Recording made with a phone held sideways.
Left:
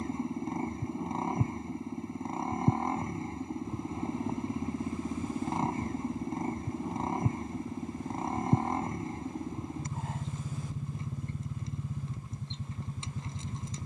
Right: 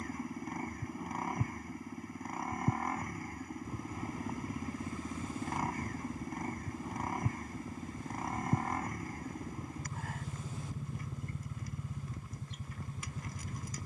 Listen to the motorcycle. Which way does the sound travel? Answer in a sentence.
You can hear the motorcycle stay in one place.